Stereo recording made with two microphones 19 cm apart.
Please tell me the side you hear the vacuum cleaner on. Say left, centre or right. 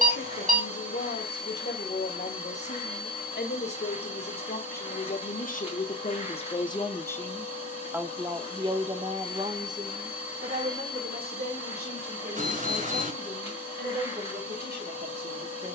left.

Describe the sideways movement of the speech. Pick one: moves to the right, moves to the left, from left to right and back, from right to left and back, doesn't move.
moves to the right.